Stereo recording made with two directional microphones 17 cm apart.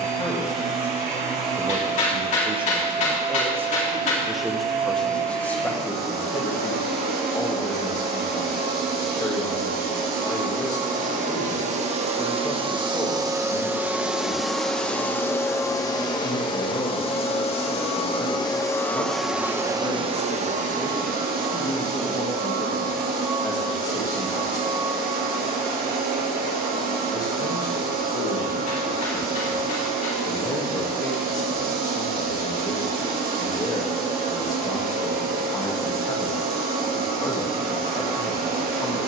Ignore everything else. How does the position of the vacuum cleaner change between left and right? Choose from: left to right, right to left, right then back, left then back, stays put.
left then back.